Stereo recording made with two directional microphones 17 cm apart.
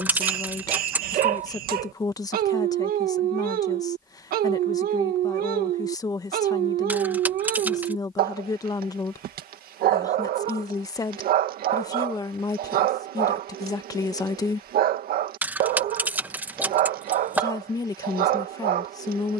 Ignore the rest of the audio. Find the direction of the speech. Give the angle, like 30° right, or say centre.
20° left.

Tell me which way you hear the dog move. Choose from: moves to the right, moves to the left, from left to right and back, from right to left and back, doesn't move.
doesn't move.